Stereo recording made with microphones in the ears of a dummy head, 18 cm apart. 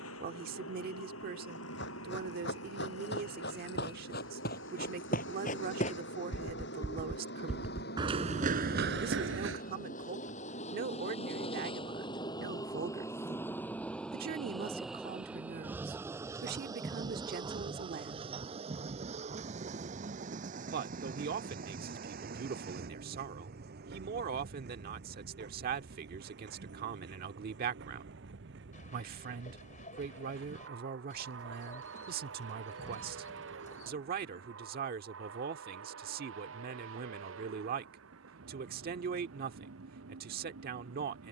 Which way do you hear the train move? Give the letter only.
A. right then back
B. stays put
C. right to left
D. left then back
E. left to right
E.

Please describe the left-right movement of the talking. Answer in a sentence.
You can hear the talking stay put.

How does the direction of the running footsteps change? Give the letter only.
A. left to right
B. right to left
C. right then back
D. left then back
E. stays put
A.